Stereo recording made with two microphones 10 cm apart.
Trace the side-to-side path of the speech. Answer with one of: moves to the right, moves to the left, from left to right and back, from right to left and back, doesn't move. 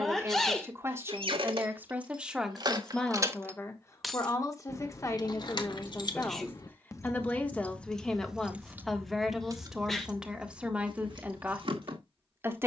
from right to left and back.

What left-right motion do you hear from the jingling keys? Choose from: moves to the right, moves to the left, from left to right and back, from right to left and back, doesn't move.
from right to left and back.